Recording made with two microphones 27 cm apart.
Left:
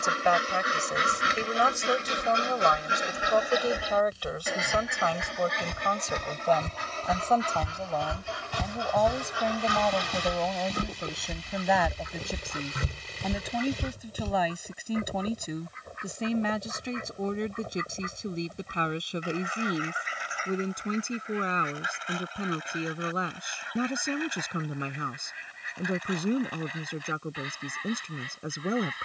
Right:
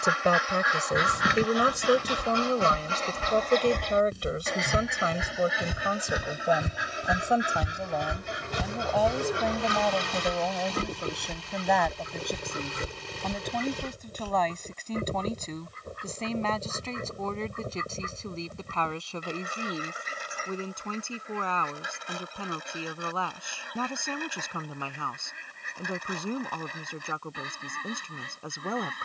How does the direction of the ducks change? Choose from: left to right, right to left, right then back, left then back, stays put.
left to right.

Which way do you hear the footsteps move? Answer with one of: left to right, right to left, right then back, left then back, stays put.
right to left.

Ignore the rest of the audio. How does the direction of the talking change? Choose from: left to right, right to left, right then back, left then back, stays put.
right to left.